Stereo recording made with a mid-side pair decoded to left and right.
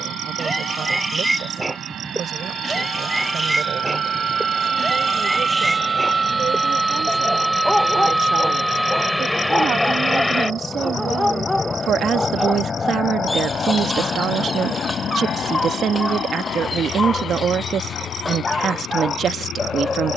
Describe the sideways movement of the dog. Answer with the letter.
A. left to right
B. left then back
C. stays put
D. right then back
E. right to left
E.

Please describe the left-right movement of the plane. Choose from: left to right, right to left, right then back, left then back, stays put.
right to left.